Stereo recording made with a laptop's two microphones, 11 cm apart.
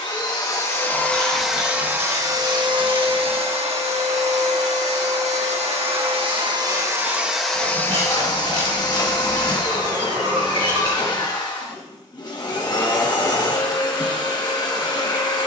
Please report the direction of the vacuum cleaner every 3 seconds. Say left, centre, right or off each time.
centre, right, centre, left, left.